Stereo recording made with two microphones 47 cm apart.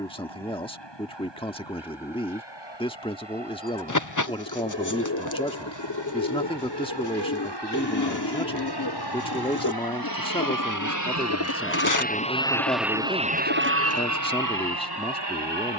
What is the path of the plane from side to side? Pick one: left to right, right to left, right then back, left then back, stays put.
left to right.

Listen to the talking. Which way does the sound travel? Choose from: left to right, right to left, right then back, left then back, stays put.
stays put.